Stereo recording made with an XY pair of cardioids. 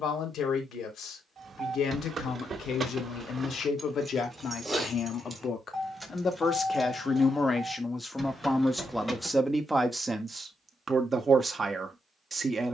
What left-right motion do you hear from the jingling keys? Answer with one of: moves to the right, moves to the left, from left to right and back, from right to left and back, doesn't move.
moves to the left.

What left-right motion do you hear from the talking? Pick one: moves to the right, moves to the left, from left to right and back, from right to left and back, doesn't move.
moves to the right.